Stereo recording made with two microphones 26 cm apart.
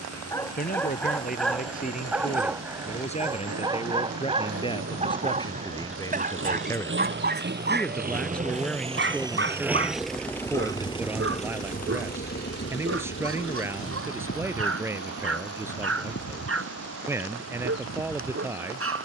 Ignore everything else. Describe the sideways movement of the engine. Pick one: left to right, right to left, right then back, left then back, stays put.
right to left.